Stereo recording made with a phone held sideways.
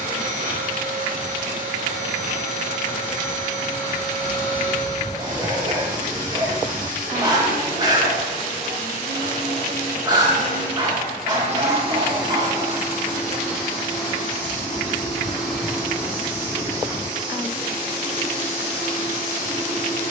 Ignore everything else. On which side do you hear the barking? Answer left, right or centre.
right.